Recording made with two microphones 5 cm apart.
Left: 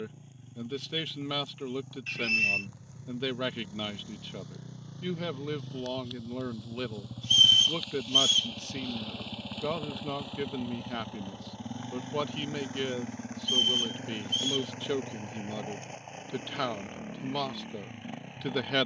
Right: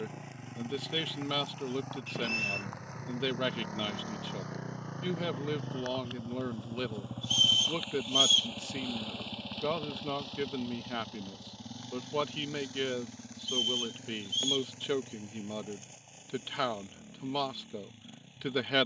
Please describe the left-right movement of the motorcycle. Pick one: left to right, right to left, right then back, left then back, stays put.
right to left.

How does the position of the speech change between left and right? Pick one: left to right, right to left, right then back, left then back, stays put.
stays put.